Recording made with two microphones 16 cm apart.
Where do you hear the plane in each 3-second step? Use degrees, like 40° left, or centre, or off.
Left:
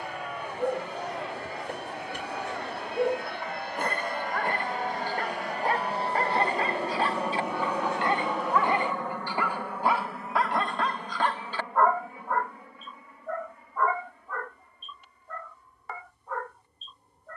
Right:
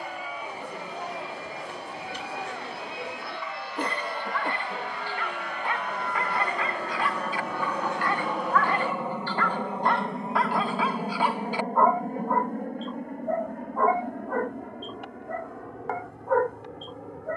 70° left, 50° left, 10° left, 30° right, 50° right, 60° right.